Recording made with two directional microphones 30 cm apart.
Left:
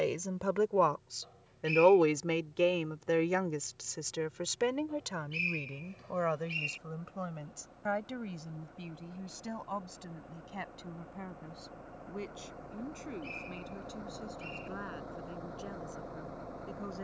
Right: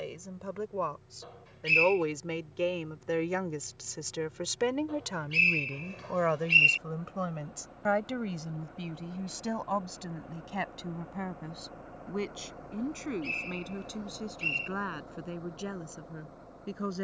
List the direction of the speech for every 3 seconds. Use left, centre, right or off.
left, centre, right, right, right, right.